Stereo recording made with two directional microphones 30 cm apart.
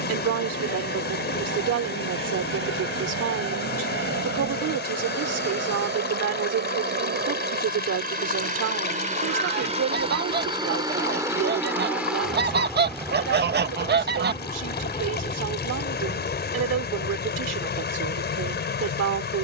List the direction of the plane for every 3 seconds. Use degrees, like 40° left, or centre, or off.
60° right, 50° right, 40° right, 20° right, 10° left, 30° left, 50° left.